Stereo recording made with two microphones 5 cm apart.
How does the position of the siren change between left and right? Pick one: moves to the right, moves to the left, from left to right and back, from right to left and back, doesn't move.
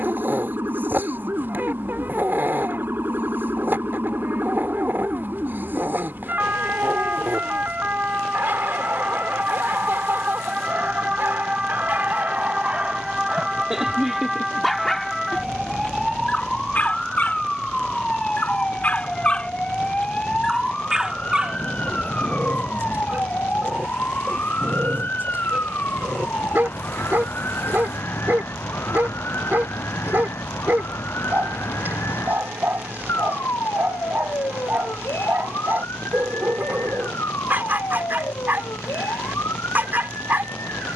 moves to the left.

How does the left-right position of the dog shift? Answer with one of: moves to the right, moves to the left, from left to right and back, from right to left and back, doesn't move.
from right to left and back.